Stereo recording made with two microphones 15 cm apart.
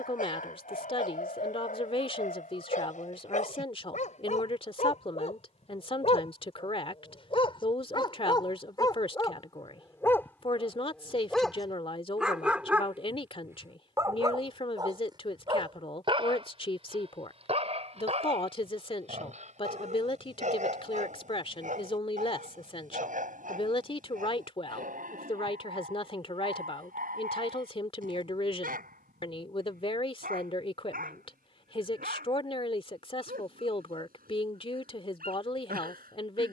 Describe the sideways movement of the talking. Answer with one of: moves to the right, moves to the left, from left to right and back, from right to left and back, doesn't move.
doesn't move.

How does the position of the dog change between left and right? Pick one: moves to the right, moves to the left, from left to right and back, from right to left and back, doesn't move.
moves to the right.